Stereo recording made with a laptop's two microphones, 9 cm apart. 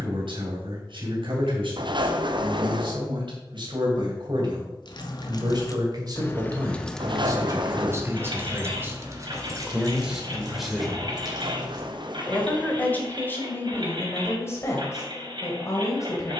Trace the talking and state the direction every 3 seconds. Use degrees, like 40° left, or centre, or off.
70° right, 60° right, 40° right, 10° right, 20° left, 40° left.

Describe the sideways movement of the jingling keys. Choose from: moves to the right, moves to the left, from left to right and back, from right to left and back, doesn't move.
moves to the right.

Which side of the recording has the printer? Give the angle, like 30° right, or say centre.
60° right.